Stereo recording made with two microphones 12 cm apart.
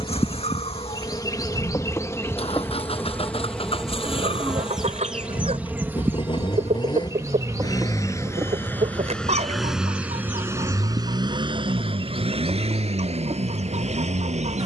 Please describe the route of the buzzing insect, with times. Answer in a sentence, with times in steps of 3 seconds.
You can hear the buzzing insect on the left from 0 s, in the centre from 3 s and on the right from 6 s.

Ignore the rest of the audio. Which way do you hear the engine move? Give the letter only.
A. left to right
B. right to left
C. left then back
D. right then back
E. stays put
A.